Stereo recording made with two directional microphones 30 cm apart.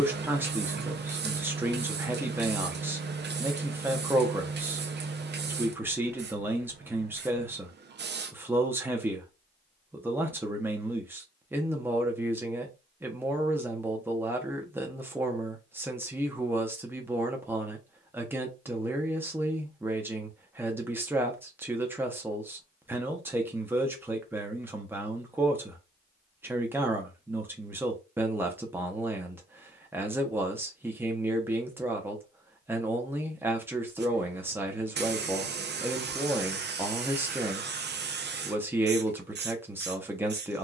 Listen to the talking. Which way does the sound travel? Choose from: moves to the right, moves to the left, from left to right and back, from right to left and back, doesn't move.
doesn't move.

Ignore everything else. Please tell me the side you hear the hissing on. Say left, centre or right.
right.